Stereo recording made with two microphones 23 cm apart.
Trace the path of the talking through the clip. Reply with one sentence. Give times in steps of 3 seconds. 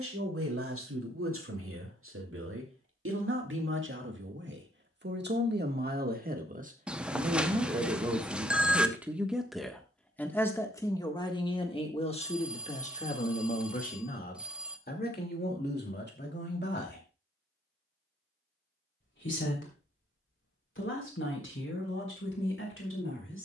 In this clip you hear the talking on the right from 0 s, in the centre from 9 s and on the left from 12 s.